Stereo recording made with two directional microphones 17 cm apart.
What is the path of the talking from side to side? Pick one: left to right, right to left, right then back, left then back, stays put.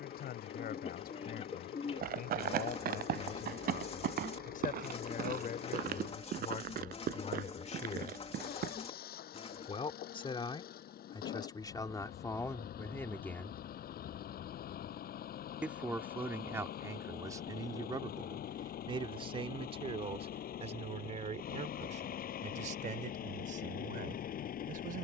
left to right.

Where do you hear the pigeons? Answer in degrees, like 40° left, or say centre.
40° left.